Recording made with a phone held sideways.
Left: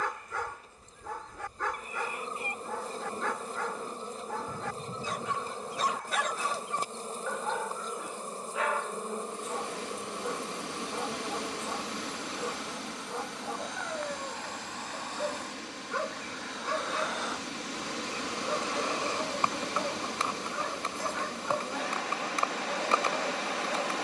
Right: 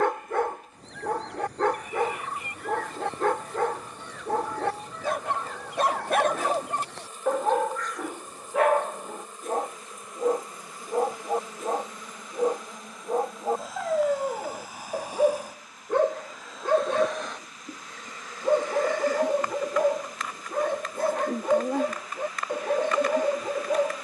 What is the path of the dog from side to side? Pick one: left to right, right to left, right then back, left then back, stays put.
stays put.